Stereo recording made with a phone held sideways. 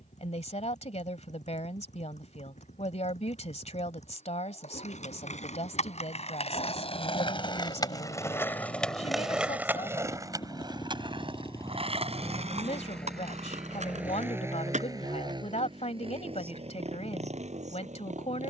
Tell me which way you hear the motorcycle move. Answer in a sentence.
In this clip you hear the motorcycle move from left to right.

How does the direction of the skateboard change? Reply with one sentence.
In this clip you hear the skateboard go from the left side to the right.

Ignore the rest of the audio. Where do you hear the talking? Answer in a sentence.
You can hear the talking on the left.